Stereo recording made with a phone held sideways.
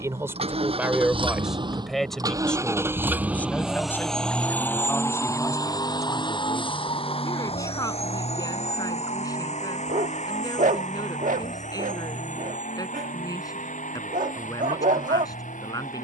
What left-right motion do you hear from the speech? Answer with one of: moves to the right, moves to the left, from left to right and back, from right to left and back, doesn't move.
moves to the left.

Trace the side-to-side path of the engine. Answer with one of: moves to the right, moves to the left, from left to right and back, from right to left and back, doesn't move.
moves to the left.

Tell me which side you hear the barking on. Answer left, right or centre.
right.